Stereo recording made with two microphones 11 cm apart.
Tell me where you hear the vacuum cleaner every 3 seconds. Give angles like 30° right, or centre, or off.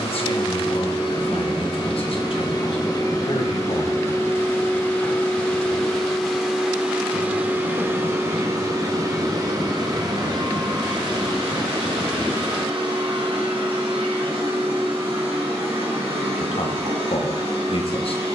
50° left, 20° left, 20° right, 40° right, 60° right, 70° right.